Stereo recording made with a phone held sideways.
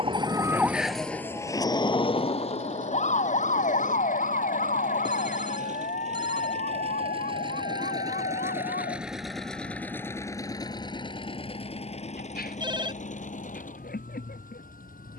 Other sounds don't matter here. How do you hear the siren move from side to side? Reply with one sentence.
In this clip you hear the siren go from the right side to the left.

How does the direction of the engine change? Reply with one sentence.
You can hear the engine go from the right side to the left.